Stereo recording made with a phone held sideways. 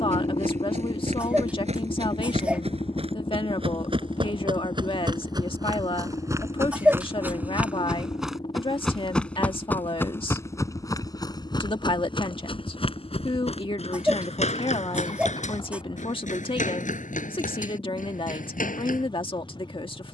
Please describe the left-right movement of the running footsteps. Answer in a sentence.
In this clip you hear the running footsteps travel towards the left.